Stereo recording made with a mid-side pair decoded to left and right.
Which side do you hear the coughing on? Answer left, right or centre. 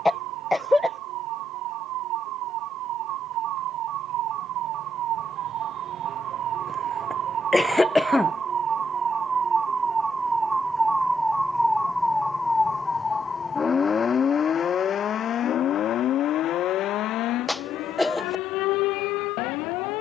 centre.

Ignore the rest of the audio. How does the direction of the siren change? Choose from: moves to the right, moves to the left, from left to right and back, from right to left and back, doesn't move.
moves to the left.